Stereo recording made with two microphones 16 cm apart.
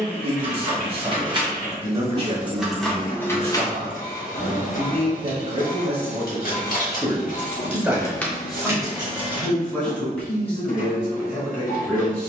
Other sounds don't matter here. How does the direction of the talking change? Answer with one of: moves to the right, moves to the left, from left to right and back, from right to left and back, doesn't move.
moves to the left.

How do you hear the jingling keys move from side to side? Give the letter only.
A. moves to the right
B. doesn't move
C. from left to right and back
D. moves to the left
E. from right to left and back
E.